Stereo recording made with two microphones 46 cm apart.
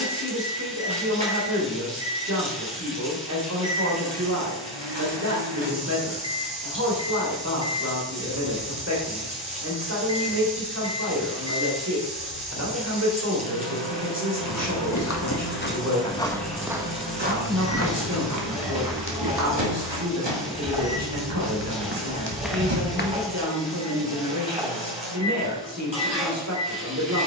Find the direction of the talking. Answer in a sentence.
In this clip you hear the talking on the right.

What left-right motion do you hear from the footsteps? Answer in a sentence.
In this clip you hear the footsteps go right and come back.